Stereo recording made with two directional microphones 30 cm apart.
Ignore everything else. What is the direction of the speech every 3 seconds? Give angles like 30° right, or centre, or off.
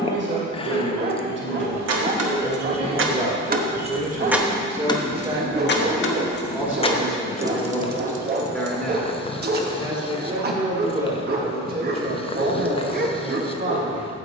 40° right, 20° right, centre, 20° right, 40° right.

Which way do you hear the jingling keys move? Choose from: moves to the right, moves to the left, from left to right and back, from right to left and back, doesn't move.
from right to left and back.